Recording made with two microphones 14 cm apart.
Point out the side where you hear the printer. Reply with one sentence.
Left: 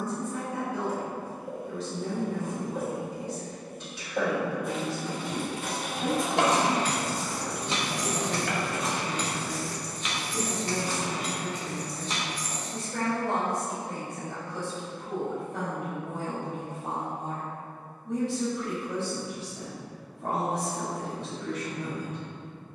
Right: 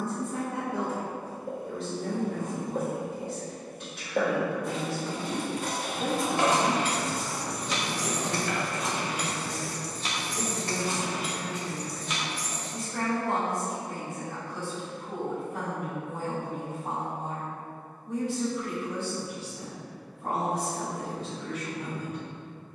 In this clip you hear the printer on the left.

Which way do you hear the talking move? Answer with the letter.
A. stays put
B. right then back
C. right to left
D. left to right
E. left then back
C.